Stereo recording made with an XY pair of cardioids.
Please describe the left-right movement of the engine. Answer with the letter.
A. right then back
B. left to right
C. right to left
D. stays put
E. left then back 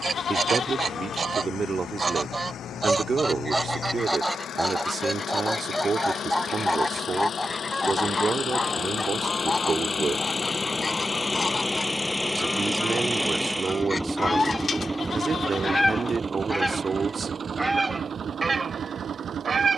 B.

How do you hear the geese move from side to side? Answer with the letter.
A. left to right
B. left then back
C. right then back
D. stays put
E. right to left
B.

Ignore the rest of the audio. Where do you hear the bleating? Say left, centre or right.
left.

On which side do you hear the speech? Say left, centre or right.
right.